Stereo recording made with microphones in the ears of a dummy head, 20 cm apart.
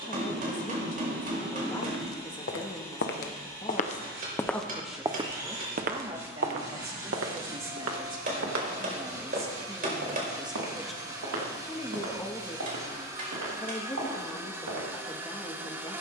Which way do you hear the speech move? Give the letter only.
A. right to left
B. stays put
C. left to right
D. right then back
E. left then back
D.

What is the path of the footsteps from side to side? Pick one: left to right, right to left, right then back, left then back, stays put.
left to right.